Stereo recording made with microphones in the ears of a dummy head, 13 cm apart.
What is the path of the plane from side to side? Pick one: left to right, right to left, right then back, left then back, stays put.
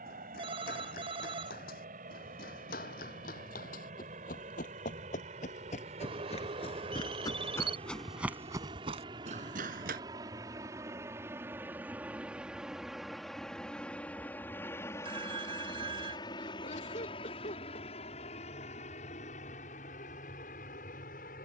right to left.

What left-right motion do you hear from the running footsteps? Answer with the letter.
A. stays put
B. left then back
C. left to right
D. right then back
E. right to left
C.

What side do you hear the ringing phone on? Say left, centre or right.
right.